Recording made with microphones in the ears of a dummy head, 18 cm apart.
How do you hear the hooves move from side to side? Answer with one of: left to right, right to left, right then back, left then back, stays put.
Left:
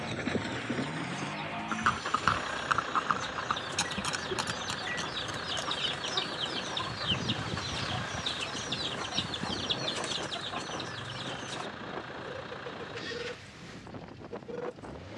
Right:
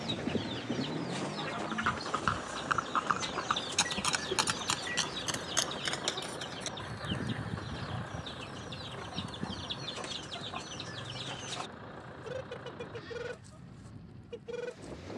left to right.